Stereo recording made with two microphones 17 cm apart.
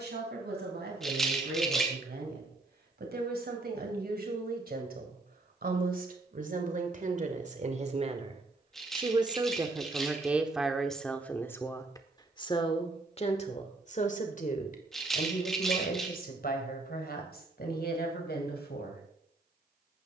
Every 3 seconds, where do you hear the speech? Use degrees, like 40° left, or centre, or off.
70° right, 60° right, 50° right, centre, 40° left, 60° left, 70° left.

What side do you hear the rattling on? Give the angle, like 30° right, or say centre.
centre.